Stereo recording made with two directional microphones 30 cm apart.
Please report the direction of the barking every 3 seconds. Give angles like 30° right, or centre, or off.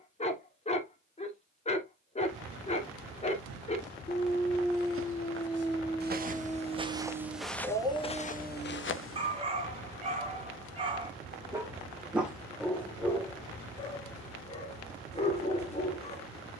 20° left, 10° left, 10° right, 20° right, 10° left, 20° left.